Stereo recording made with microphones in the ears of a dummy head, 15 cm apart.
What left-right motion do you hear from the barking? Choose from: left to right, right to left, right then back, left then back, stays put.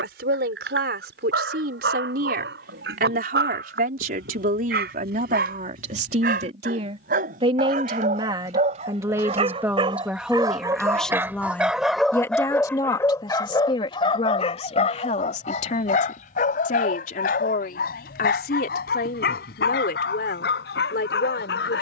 right to left.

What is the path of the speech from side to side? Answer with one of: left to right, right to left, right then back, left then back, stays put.
right to left.